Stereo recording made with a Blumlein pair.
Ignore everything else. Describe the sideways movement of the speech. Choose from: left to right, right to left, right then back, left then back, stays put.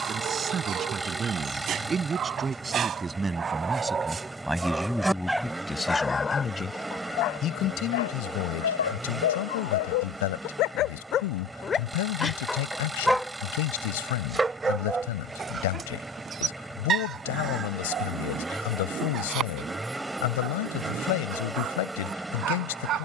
right to left.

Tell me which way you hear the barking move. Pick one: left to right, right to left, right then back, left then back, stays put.
left then back.